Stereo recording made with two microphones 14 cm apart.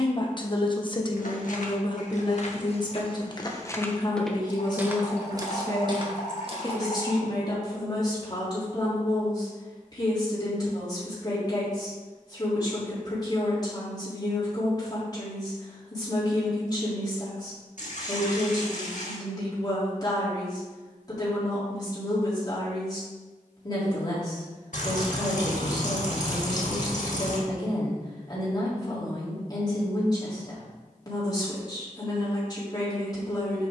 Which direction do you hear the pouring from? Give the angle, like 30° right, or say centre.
70° left.